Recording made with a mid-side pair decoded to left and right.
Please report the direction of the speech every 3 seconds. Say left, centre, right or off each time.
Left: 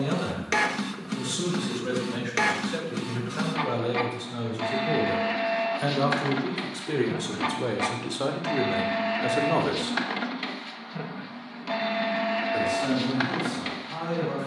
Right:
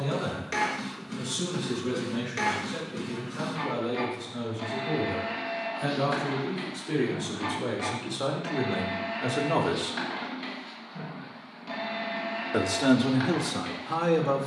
left, left, left, centre, right.